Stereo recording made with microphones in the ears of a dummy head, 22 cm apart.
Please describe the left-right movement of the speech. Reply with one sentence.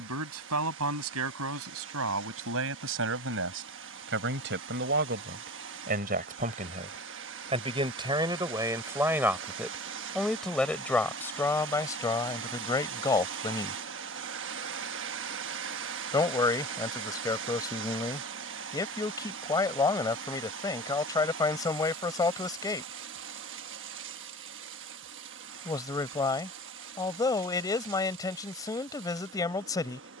You can hear the speech move to the left.